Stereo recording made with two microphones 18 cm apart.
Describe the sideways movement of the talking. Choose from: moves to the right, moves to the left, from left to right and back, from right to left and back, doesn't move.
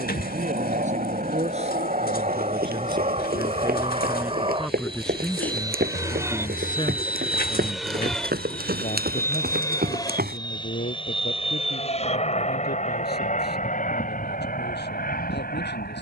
moves to the left.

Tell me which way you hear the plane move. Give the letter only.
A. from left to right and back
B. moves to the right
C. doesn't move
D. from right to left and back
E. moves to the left
E.